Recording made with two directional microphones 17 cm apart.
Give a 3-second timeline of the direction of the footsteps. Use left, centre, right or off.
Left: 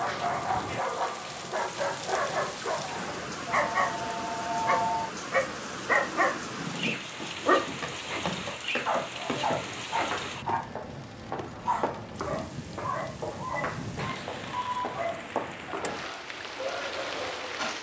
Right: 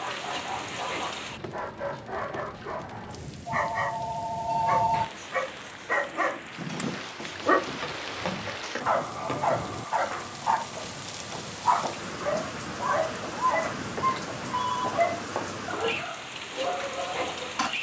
off, off, centre, left, left, centre.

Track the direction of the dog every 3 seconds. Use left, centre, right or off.
left, left, centre, right, right, right.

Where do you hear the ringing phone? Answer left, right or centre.
right.